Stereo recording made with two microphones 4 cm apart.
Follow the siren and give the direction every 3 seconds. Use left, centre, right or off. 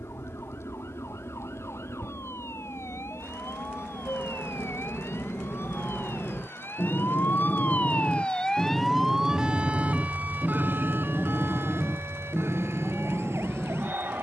left, left, left, right, right.